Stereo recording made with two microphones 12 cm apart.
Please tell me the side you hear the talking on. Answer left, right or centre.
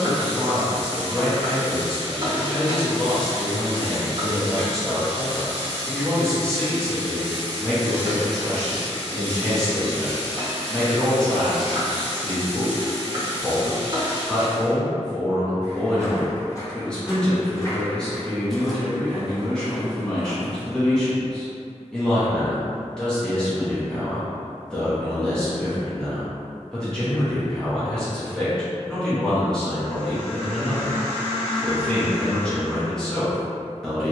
centre.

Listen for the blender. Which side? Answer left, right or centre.
right.